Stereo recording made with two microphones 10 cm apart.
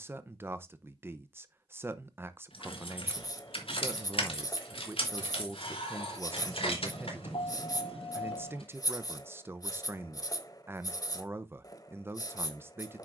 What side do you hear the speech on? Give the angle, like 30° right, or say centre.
20° right.